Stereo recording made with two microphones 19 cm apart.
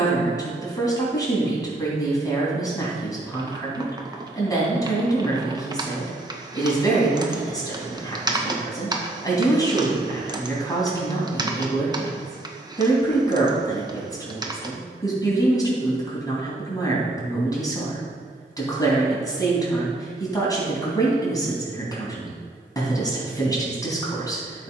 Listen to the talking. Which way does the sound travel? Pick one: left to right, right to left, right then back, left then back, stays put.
stays put.